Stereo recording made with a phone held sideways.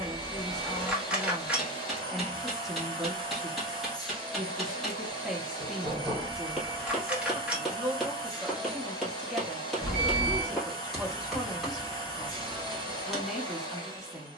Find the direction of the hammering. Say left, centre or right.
centre.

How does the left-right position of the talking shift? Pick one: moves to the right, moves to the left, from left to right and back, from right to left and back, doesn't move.
doesn't move.